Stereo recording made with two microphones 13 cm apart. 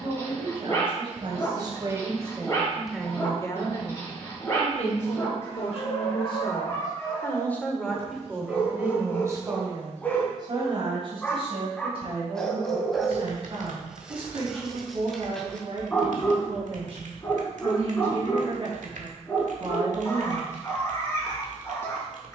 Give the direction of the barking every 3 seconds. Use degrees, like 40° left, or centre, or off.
20° left, 20° left, 20° left, 10° left, centre, 10° left, 20° left, 20° left.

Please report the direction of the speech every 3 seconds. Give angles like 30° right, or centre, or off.
30° right, 50° left, 10° left, 40° right, 50° right, 50° right, 50° right, off.